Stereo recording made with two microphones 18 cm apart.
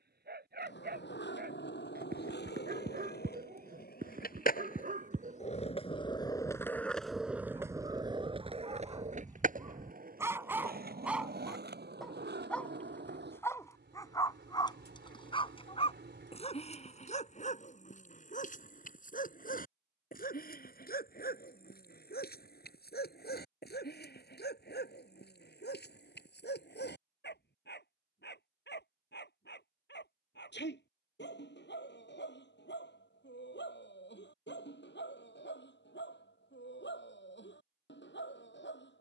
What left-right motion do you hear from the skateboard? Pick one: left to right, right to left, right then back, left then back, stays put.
left to right.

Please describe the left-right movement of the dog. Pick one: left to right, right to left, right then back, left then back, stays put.
right to left.